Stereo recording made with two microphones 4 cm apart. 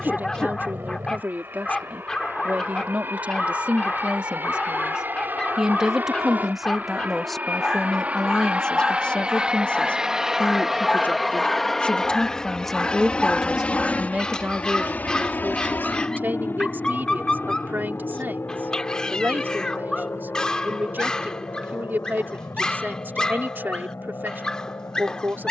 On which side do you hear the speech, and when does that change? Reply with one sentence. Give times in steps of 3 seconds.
You can hear the speech on the right from 0 s, in the centre from 6 s, on the left from 9 s, in the centre from 12 s and on the right from 15 s.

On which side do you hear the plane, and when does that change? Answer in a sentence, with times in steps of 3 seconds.
You can hear the plane on the right from 0 s, in the centre from 9 s and on the left from 12 s.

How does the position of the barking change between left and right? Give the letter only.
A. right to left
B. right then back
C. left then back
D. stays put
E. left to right
D.